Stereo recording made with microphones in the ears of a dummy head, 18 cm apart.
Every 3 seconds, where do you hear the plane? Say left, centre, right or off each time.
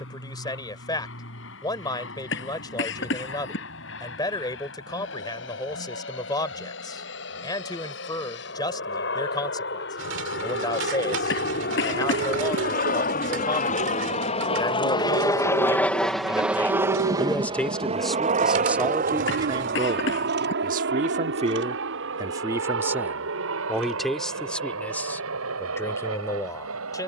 left, left, left, left, left, centre, right, right, right.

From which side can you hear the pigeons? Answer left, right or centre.
right.